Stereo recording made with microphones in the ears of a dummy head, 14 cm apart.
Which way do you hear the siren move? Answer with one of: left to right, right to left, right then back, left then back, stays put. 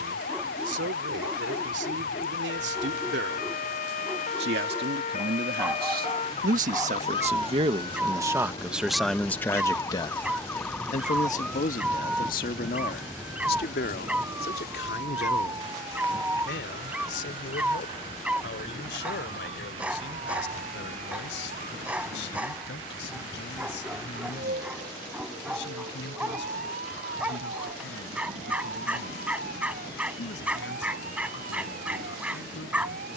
left to right.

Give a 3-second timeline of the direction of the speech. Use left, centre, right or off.
right, right, right, left, left, left, left, left, left, left, left.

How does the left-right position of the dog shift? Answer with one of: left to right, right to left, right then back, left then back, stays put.
stays put.